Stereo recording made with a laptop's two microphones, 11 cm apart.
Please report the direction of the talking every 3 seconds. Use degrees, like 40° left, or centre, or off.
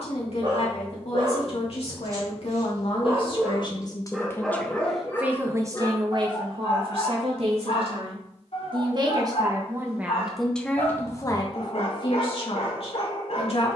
60° left, 10° left, 50° right, centre, 60° left.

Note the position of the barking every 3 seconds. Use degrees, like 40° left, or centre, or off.
40° right, centre, 50° left, 70° left, 70° left.